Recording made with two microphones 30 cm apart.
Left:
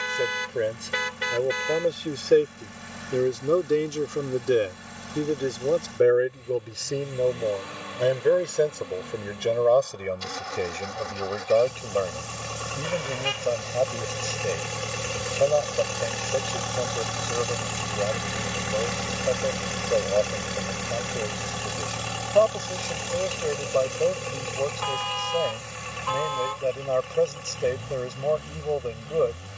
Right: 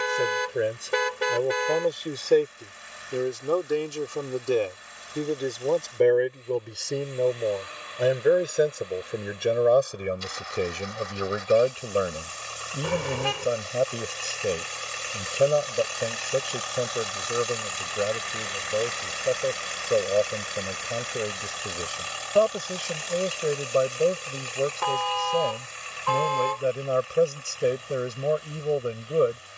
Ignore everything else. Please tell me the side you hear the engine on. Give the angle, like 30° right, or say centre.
70° left.